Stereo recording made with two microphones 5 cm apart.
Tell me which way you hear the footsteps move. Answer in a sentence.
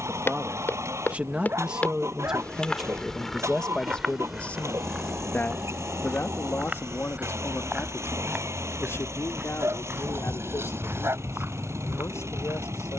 You can hear the footsteps travel towards the right.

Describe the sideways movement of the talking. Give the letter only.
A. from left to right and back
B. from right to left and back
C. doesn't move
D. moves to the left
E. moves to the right
D.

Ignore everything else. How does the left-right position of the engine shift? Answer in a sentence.
You can hear the engine stay put.